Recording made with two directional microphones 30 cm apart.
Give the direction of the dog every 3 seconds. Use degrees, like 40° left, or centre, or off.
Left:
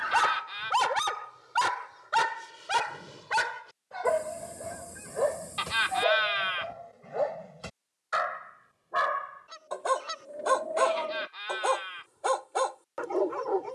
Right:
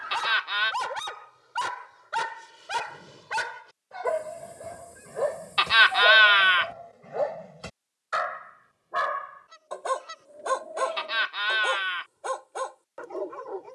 30° left, 10° left, 10° right, 10° left, 40° left.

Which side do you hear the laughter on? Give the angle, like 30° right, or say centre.
70° right.